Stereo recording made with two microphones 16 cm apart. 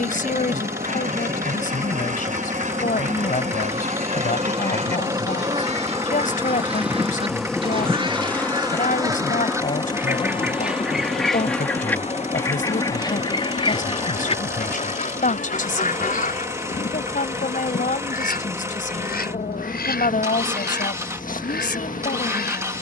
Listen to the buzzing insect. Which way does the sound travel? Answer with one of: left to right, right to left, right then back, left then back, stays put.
right to left.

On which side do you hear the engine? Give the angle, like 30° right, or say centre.
20° right.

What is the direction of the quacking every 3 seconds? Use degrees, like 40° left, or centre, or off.
50° right, 50° right, 40° right, 10° right, 30° left, 50° left, 70° left, 80° left.